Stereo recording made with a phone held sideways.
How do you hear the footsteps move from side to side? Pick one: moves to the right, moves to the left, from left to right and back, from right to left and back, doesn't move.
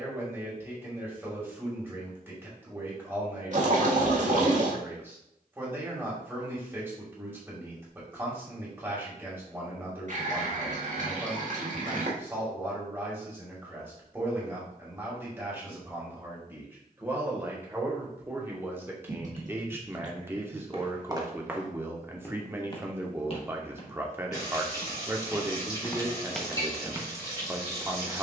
from right to left and back.